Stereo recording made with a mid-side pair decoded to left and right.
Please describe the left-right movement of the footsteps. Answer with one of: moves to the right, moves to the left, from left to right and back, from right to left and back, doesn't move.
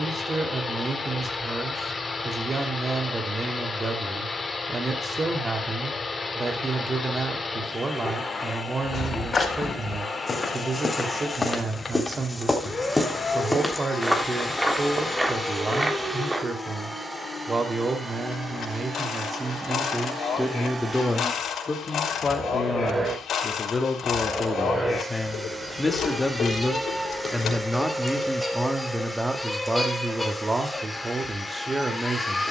moves to the right.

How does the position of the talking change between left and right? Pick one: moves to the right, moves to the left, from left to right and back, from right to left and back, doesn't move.
from right to left and back.